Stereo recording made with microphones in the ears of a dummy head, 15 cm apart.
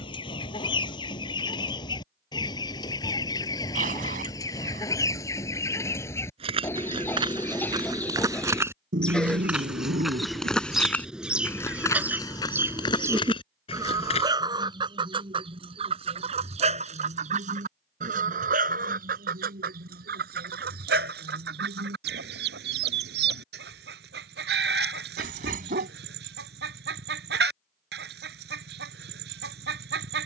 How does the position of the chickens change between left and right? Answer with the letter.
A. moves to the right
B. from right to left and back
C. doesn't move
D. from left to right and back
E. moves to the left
A.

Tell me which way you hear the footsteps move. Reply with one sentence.
In this clip you hear the footsteps move from right to left.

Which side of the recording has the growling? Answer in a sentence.
You can hear the growling on the right.